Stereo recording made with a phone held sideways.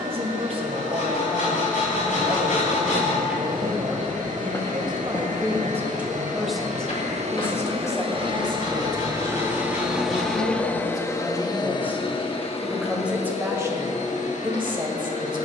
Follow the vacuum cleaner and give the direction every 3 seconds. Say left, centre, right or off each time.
right, right, right, centre, left.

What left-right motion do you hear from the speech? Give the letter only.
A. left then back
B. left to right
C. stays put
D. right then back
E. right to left
A.